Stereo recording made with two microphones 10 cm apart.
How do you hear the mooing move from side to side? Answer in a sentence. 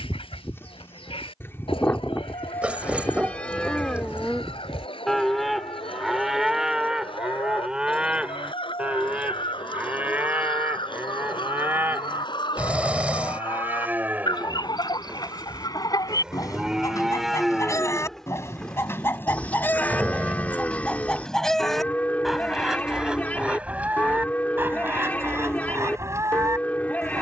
In this clip you hear the mooing move from left to right and back again.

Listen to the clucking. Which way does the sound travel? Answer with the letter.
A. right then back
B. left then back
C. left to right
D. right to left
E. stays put
C.